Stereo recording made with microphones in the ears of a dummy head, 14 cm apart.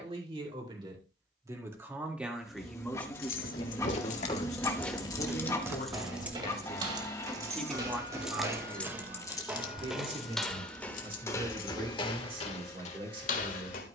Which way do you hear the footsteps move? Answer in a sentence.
You can hear the footsteps go right and come back.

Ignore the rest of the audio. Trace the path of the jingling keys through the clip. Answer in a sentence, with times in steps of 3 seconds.
You can hear the jingling keys not at all from 0 s, on the left from 3 s, in the centre from 6 s, on the left from 9 s and not at all from 12 s.